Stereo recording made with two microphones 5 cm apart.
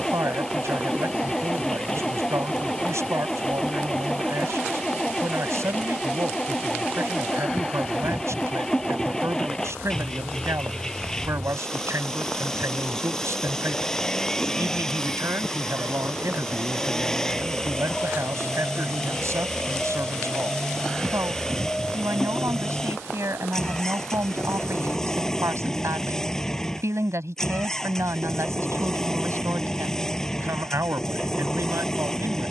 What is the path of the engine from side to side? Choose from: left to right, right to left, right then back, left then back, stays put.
stays put.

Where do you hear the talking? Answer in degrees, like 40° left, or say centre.
70° right.